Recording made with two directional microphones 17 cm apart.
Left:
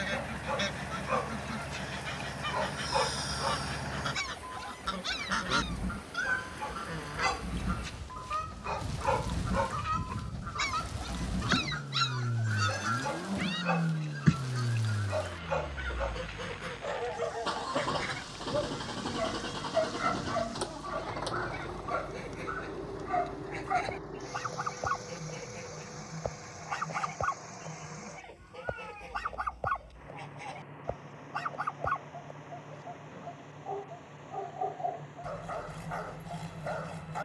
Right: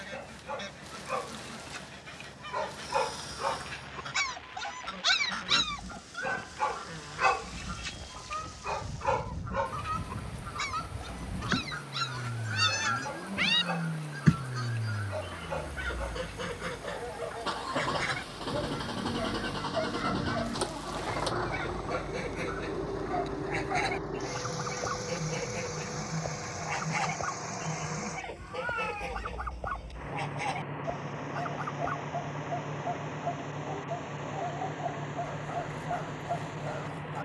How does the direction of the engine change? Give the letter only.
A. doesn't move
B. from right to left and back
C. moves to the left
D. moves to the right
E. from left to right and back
D.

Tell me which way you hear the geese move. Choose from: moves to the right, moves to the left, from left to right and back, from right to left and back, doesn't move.
moves to the right.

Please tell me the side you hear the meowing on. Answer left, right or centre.
right.